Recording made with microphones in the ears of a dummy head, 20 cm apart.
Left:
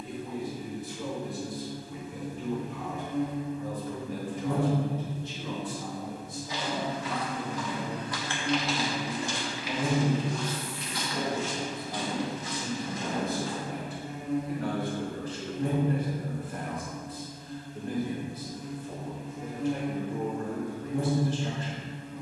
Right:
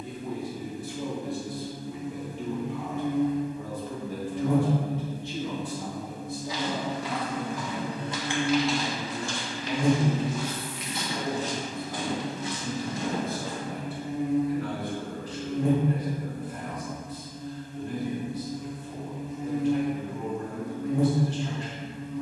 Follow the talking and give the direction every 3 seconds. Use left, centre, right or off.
right, right, right, centre, left, left, left, left.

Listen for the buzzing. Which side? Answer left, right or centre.
right.